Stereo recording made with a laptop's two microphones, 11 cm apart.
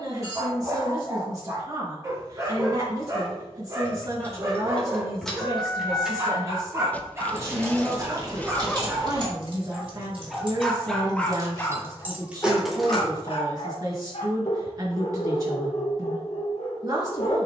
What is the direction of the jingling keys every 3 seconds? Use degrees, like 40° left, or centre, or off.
off, 10° left, 30° right, 50° right, 10° right, off.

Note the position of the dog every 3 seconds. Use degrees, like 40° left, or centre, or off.
30° right, 30° right, 30° right, centre, 60° left, 70° left.